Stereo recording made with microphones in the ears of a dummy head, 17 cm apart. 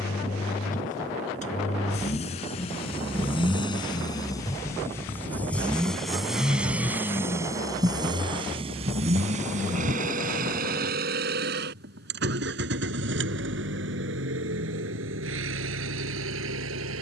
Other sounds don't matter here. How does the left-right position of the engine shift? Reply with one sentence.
You can hear the engine move from left to right.